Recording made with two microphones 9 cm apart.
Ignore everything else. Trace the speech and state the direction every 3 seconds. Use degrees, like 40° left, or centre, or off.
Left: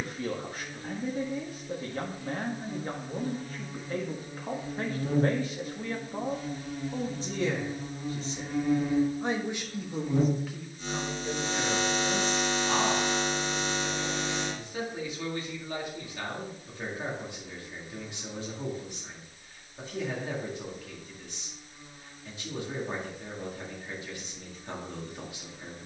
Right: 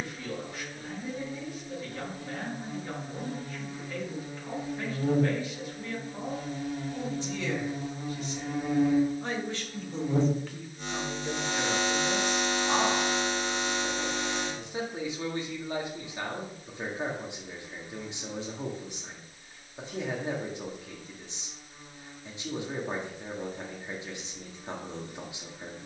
40° left, 40° left, 40° left, centre, 20° right, 20° right, 20° right, 20° right, 20° right.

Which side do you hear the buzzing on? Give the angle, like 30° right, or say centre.
70° right.